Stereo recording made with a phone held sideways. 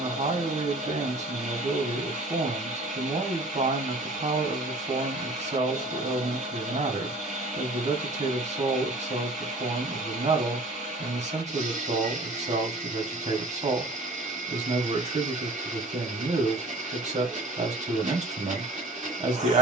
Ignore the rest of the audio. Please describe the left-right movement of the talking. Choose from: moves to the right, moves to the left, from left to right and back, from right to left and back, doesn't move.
doesn't move.